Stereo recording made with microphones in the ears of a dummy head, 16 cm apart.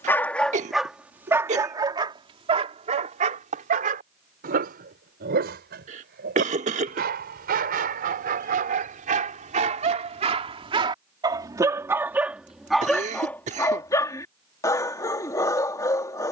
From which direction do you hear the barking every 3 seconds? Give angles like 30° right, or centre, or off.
10° right, 50° right, 50° right, 30° right, 10° left, 20° left.